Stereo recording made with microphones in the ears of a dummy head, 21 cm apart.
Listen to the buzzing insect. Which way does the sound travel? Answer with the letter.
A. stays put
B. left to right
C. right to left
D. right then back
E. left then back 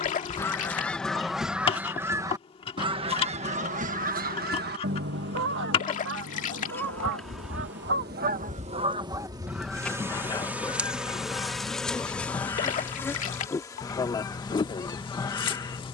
D.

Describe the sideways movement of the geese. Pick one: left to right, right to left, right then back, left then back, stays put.
right then back.